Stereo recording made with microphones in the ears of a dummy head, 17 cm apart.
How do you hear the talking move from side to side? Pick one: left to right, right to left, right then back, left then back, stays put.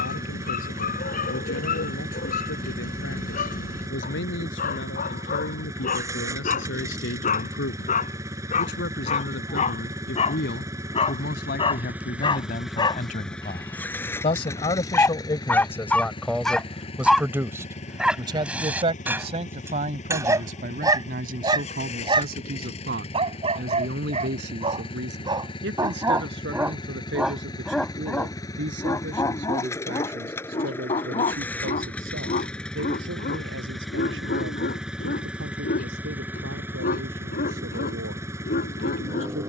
left to right.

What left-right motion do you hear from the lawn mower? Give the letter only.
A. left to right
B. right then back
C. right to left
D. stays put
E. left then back
E.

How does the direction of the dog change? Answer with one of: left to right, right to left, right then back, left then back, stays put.
right then back.